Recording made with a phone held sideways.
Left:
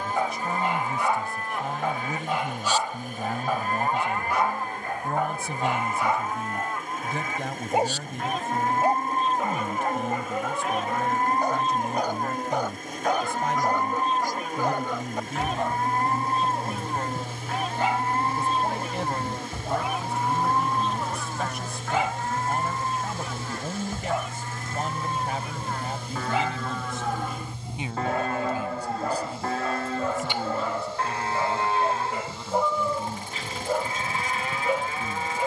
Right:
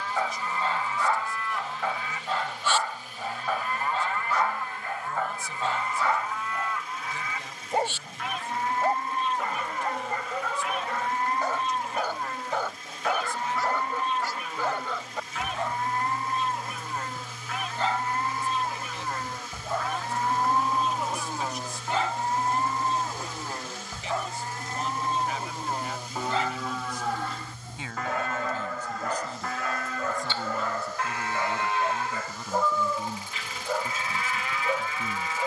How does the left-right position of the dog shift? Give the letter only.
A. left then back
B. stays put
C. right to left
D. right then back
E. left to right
B.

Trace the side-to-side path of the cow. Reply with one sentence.
You can hear the cow go right and come back.